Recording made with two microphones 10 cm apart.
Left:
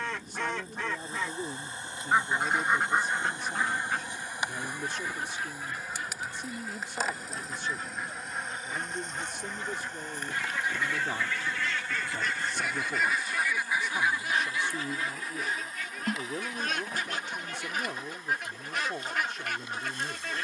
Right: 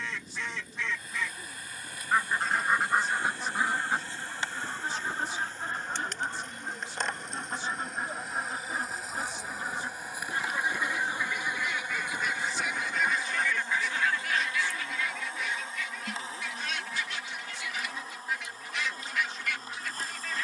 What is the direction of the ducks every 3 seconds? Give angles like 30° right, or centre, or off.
30° left, 30° right, 40° right, 20° right, 10° left, 40° left, 50° left.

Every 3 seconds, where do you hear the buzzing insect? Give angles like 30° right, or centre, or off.
30° left, 20° left, centre, 10° right, 20° right, 30° right, 40° right.